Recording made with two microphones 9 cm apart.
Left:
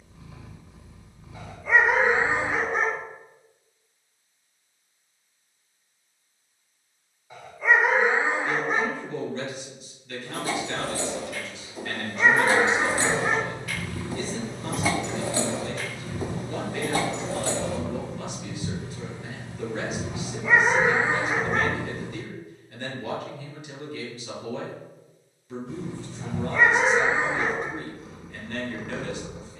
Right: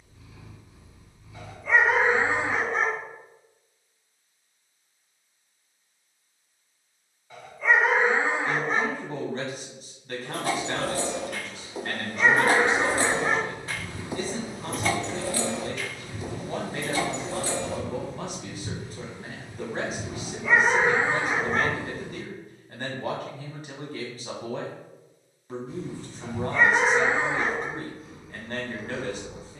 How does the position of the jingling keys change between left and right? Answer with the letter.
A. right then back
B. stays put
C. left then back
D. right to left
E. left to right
D.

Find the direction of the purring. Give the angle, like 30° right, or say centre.
70° left.